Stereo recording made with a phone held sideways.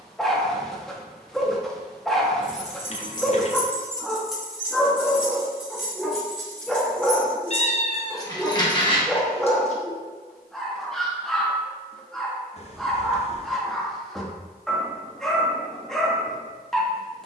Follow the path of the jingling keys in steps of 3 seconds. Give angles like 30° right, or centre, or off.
40° left, centre, 10° left, 40° left, off, off.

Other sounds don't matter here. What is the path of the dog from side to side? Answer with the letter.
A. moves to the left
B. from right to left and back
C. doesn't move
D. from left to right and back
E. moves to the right
C.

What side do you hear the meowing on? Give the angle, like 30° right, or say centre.
40° left.